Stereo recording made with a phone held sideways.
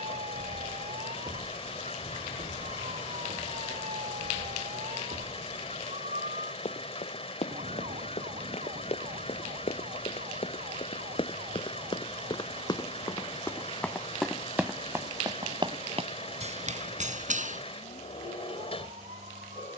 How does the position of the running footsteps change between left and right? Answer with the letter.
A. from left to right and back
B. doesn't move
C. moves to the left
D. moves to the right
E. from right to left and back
D.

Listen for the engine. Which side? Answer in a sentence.
In this clip you hear the engine on the left.